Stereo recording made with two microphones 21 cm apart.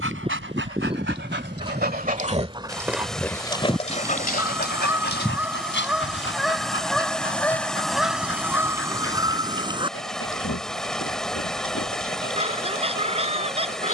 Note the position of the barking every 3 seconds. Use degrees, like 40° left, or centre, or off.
50° right, 40° left, 70° left, 70° left, 80° left.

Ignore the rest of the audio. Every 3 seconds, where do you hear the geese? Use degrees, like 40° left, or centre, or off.
20° right, 10° right, centre, 20° right, 30° right.